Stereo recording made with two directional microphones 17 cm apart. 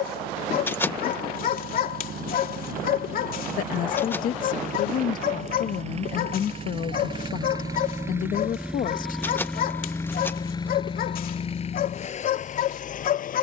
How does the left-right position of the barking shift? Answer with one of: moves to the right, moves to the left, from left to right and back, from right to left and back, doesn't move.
doesn't move.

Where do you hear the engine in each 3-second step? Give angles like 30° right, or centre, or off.
60° right, 50° right, 20° right, 20° left, 50° left.